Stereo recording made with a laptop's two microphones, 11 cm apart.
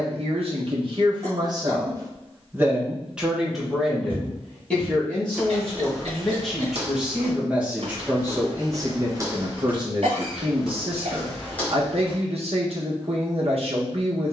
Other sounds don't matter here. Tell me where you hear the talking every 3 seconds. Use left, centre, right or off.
right, centre, centre, right, right.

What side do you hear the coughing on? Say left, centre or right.
right.